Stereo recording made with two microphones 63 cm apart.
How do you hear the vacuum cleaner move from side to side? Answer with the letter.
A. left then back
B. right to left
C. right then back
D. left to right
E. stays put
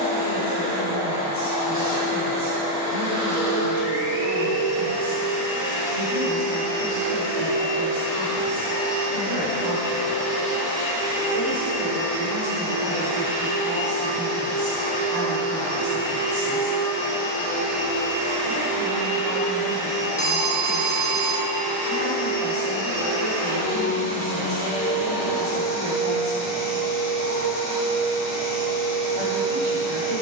E.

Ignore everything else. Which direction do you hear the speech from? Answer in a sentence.
You can hear the speech on the right.